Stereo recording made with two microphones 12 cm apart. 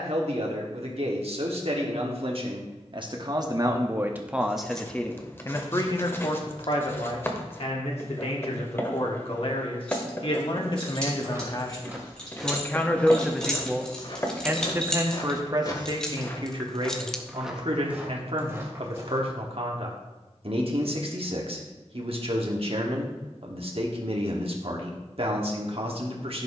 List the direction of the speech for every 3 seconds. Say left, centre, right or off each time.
right, centre, left, left, centre, right, right, right, right.